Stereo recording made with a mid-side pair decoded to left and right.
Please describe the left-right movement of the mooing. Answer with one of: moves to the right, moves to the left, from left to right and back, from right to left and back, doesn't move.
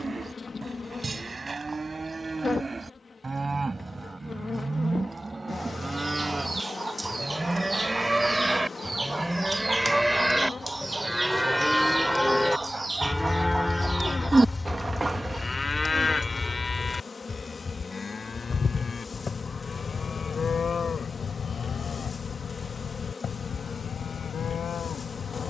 moves to the left.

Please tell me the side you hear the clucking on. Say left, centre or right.
right.